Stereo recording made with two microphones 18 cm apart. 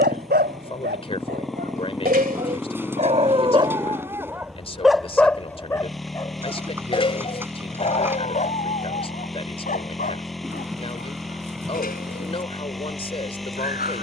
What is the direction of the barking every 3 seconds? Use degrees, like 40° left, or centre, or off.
60° right, 10° right, 30° left, 50° left, 50° left.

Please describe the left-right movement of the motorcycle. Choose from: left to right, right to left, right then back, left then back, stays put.
stays put.